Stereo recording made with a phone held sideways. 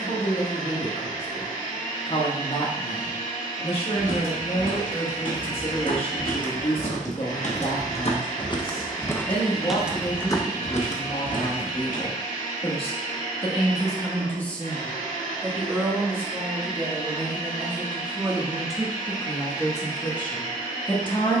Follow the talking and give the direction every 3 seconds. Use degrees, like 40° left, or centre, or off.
40° left, 40° left, 40° left, 40° left, 20° left, 20° right, 10° left.